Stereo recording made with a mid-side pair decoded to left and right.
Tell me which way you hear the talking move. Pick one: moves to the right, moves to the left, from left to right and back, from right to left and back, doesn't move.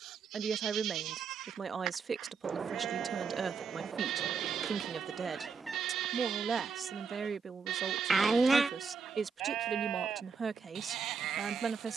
doesn't move.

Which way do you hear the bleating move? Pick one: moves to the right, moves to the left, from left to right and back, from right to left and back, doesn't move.
doesn't move.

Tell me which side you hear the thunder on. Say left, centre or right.
right.